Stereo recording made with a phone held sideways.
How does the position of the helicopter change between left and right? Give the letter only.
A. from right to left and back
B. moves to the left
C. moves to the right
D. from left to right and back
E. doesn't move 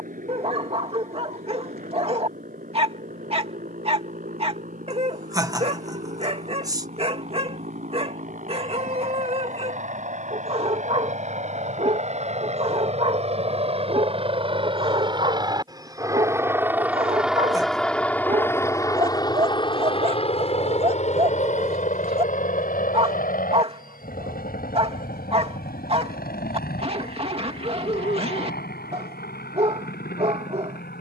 B.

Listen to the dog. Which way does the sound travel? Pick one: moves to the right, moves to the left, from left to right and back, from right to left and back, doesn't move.
doesn't move.